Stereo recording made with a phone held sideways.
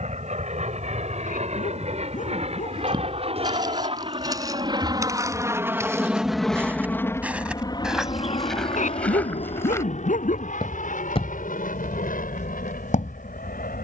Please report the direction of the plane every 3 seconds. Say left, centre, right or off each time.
right, right, left, left, left.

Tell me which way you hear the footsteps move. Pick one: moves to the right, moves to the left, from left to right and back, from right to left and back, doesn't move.
moves to the left.